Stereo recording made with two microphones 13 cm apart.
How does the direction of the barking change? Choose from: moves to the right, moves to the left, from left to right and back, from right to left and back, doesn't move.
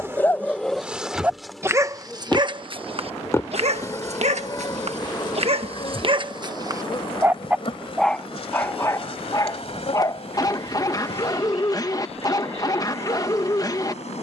from left to right and back.